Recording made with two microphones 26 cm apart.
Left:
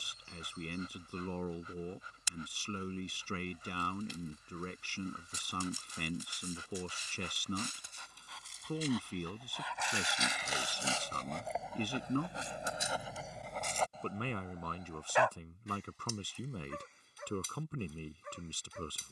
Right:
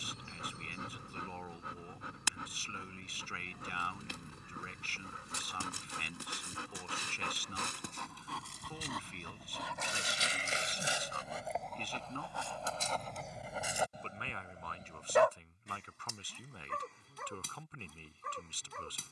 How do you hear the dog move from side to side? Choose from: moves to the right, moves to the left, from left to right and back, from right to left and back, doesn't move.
from right to left and back.